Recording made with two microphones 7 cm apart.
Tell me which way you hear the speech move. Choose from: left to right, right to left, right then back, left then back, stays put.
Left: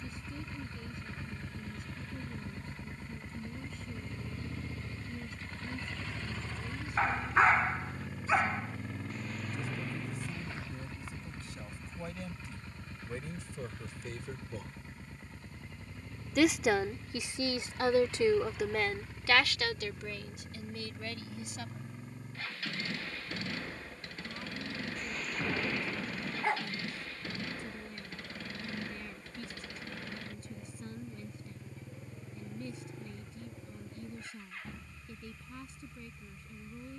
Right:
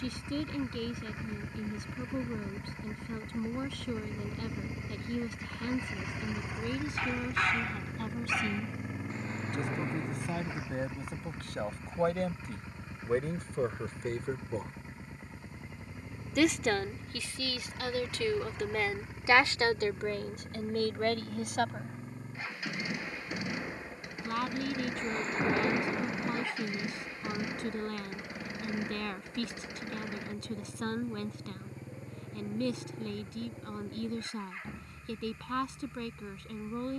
left then back.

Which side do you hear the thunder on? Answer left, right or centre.
right.